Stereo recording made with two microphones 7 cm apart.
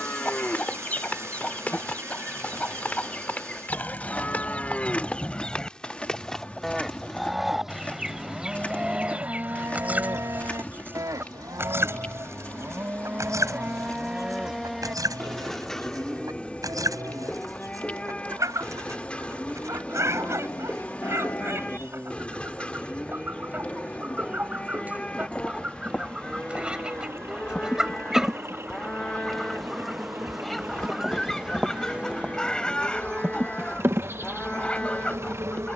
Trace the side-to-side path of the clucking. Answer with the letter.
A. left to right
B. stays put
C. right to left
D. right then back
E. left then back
D.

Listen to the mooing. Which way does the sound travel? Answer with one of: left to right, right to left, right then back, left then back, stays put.
right then back.